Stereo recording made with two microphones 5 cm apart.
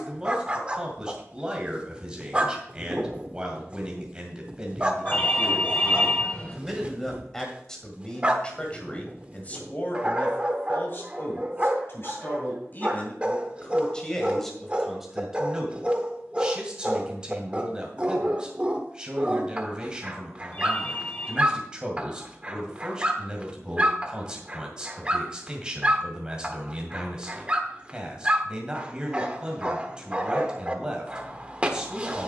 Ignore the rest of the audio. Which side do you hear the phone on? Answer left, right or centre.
left.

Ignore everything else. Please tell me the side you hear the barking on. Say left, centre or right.
right.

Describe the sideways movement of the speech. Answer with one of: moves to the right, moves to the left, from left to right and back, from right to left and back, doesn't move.
from right to left and back.